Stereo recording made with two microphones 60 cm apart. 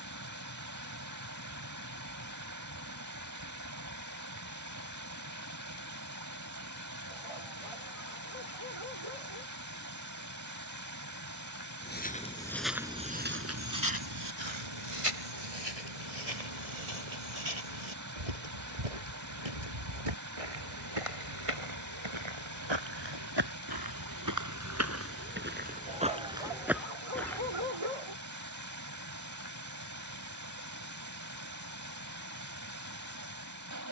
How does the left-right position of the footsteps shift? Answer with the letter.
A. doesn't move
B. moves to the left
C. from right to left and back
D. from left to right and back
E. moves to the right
D.